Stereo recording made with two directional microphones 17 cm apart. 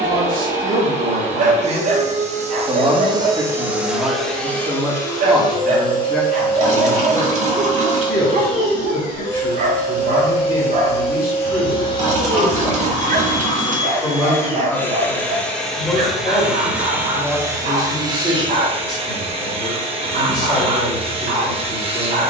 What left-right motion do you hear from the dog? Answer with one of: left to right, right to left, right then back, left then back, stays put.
stays put.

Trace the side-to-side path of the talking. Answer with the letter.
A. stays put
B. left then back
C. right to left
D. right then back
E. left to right
C.